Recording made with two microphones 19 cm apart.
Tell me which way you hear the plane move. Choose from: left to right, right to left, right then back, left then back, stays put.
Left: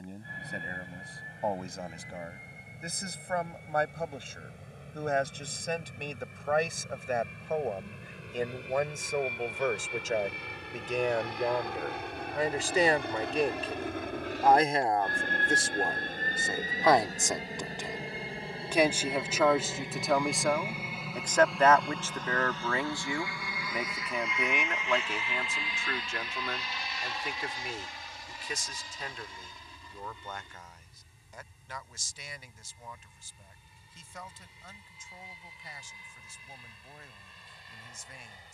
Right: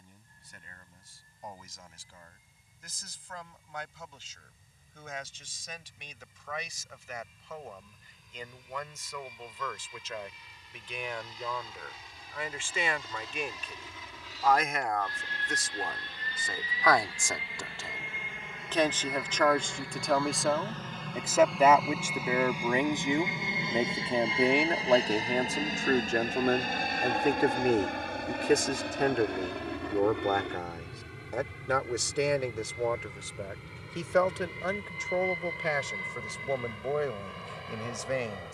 left to right.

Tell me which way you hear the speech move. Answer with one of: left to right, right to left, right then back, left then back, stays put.
left to right.